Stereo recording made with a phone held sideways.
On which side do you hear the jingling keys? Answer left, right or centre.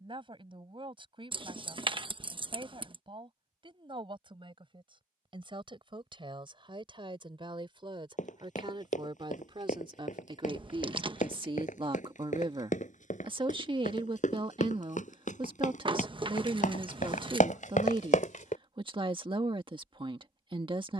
right.